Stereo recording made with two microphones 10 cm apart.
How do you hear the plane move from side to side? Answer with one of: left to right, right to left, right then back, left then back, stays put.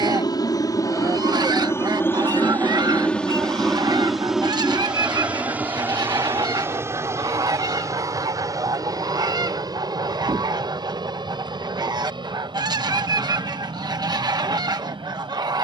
left to right.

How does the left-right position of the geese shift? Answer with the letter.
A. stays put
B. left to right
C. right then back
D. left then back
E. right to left
A.